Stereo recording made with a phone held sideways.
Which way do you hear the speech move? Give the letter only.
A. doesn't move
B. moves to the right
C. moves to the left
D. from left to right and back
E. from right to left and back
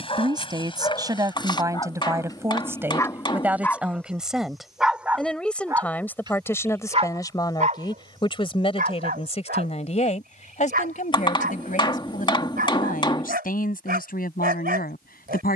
C.